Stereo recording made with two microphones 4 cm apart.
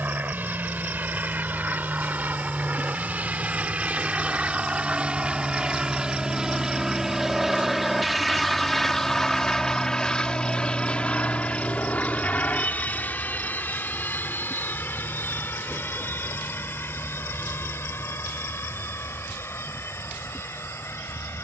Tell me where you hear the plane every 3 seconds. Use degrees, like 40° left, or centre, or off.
50° right, 30° right, 10° right, 20° left, 40° left, 60° left, 60° left.